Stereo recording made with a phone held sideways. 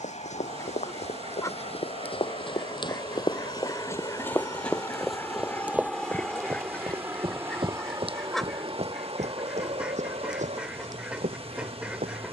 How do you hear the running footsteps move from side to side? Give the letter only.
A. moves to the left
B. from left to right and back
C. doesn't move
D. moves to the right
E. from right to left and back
D.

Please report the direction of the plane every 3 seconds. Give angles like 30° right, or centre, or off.
50° left, 20° left, 20° right, 50° right.